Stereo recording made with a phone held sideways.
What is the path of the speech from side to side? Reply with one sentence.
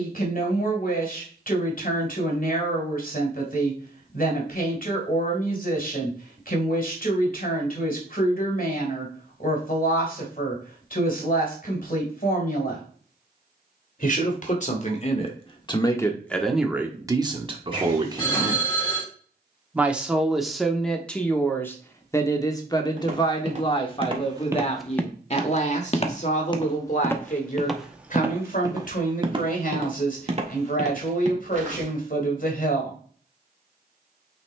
You can hear the speech move from left to right and back again.